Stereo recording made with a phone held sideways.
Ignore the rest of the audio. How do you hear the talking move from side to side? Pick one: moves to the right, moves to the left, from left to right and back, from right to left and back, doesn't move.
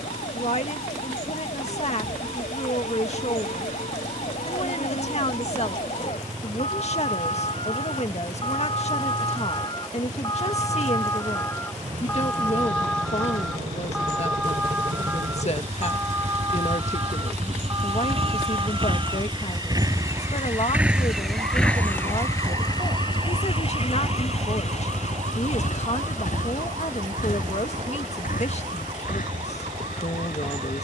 doesn't move.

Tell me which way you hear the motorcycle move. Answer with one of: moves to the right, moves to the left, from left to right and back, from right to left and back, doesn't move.
moves to the left.